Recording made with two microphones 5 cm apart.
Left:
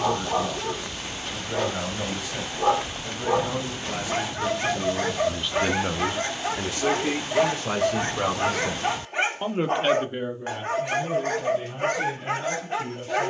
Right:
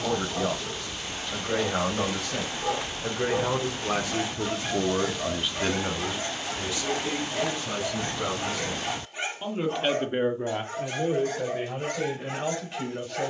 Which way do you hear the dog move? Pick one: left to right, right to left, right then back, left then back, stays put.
stays put.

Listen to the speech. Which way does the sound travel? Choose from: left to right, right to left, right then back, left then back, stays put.
left then back.